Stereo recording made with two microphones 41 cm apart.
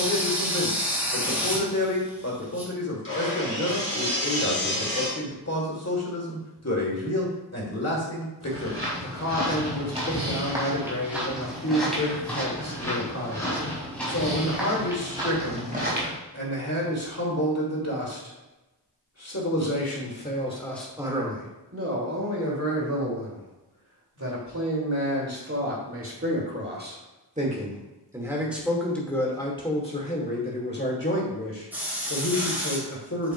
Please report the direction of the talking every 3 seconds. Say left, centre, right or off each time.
left, left, left, left, left, left, left, right, right, centre, left.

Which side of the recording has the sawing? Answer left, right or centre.
left.